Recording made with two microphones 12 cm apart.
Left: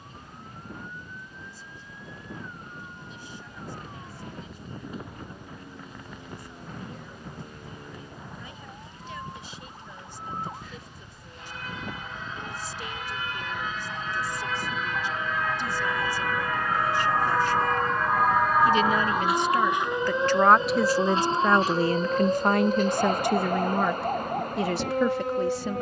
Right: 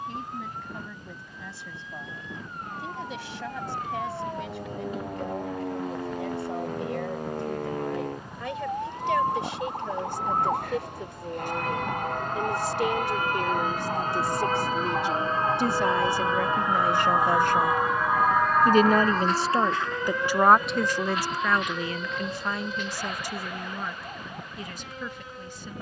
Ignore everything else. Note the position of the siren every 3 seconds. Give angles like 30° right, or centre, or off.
80° right, 80° right, 70° right, 60° right, 50° right, 20° right, 10° left, 40° left, 50° left.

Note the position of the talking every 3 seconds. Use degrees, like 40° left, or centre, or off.
80° right, 80° right, 70° right, 70° right, 70° right, 60° right, 20° right, 50° left, 70° left.